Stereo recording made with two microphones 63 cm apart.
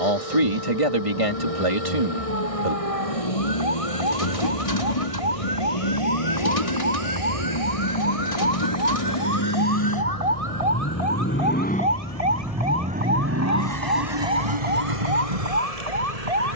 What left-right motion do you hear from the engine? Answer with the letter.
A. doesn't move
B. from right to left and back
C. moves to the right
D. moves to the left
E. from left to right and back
C.